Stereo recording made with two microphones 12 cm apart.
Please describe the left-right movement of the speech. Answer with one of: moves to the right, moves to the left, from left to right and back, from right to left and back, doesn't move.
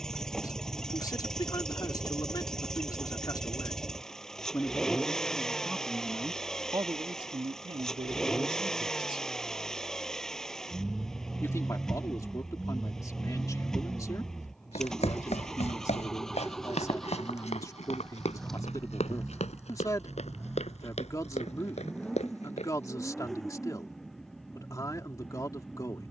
from left to right and back.